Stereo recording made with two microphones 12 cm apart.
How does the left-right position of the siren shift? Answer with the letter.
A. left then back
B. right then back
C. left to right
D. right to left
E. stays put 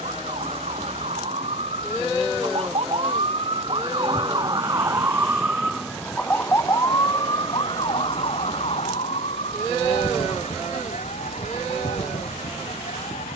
D.